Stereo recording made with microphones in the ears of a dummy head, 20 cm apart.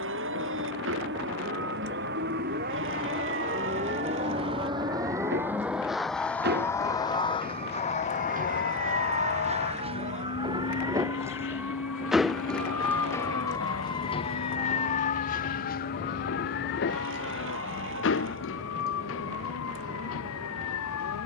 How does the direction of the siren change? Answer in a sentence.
You can hear the siren move to the left.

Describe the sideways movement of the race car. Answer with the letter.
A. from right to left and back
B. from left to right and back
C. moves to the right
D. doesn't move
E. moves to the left
E.